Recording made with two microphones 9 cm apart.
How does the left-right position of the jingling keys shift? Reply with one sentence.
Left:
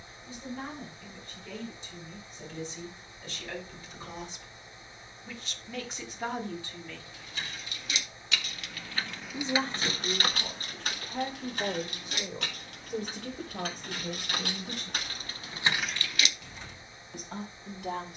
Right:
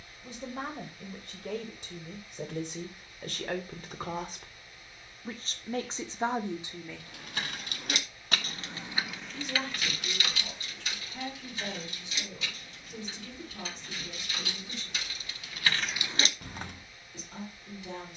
You can hear the jingling keys move from right to left and back again.